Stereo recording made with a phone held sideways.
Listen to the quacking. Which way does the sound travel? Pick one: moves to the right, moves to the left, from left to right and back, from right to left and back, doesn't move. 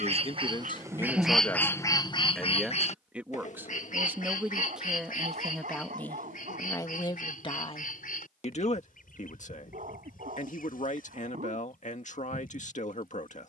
moves to the left.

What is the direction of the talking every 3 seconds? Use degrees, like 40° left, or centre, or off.
20° left, centre, 30° left, 60° left, 60° left.